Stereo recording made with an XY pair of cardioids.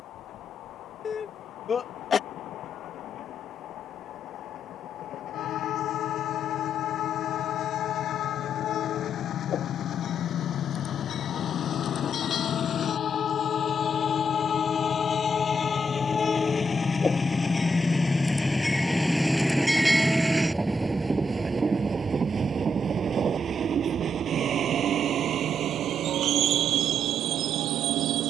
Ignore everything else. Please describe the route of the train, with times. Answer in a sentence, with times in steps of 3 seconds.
You can hear the train on the left from 0 s, in the centre from 18 s and on the right from 21 s.